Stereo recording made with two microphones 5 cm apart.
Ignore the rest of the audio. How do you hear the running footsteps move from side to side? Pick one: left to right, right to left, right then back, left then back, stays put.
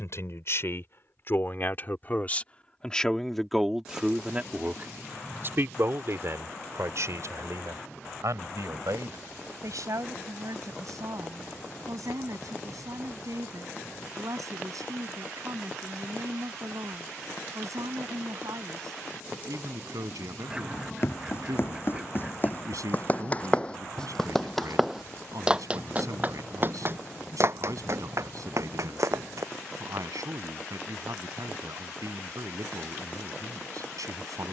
left to right.